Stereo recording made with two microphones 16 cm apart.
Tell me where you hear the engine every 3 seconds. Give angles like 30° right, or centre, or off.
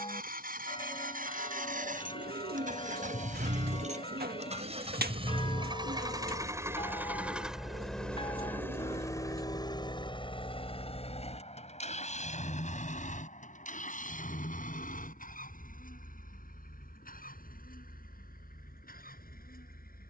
60° right, 40° right, centre, 40° left, 60° left, 60° left, 70° left.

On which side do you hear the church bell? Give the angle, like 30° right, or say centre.
30° left.